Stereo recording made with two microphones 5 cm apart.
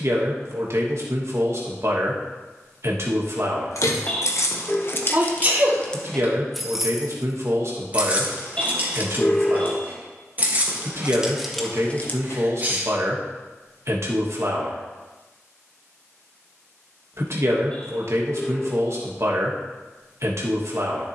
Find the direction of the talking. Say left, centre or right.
right.